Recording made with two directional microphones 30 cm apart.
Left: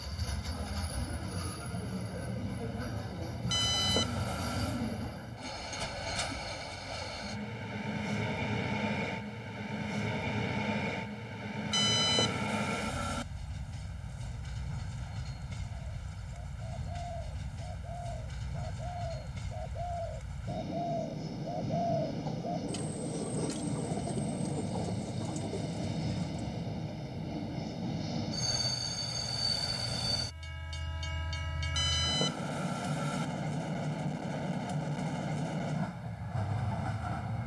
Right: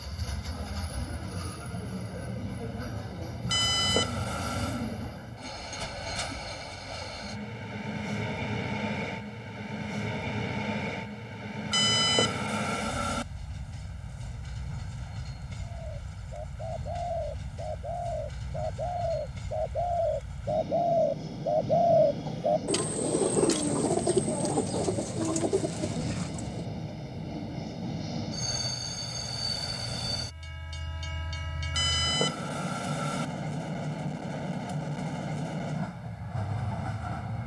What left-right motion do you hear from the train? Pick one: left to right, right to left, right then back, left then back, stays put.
stays put.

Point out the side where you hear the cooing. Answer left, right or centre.
right.